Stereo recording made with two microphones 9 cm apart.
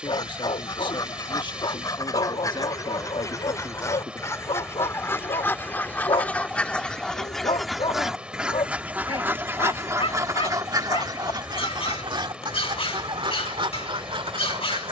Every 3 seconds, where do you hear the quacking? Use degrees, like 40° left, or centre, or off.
40° left, 30° left, centre, 40° right, 70° right.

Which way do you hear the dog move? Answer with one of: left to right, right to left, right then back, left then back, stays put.
stays put.